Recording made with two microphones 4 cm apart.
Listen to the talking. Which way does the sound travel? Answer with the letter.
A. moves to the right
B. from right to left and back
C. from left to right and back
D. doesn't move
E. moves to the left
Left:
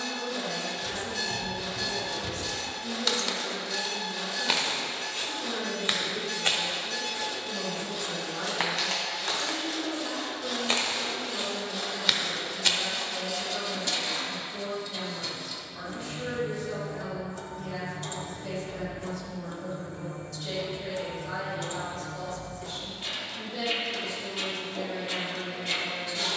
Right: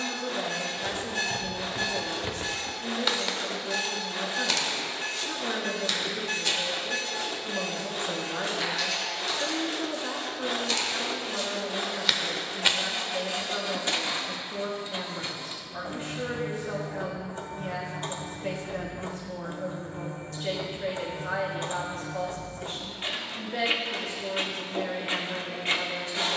D.